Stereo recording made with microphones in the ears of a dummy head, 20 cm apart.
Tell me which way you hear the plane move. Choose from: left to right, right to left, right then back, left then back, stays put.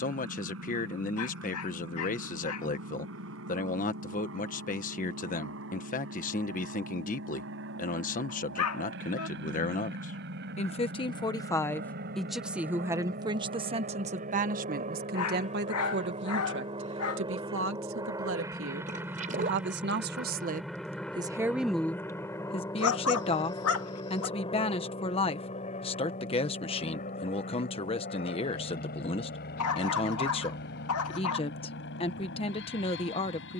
right to left.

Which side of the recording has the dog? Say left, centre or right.
left.